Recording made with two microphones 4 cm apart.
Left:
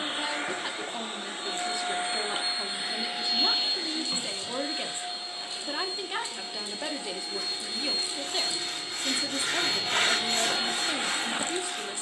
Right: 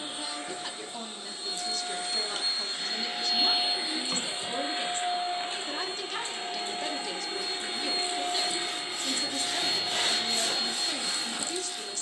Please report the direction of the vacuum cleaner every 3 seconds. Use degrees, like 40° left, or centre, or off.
40° left, 20° right, 30° right, 20° left.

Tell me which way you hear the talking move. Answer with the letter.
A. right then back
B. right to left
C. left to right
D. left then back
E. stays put
E.